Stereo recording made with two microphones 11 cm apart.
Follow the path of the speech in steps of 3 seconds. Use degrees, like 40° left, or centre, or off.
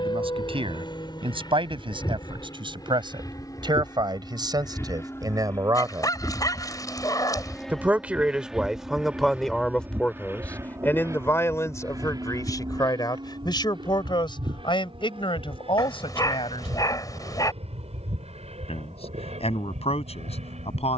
50° right, 40° right, 10° right, 10° left, 40° left, 50° left, 70° left.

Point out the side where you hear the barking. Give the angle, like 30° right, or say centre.
30° left.